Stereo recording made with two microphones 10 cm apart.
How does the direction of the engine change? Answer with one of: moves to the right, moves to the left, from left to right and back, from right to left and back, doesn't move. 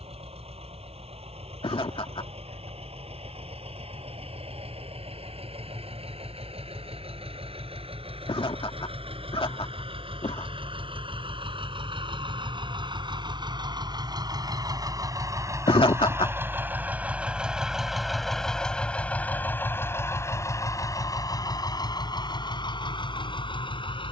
moves to the left.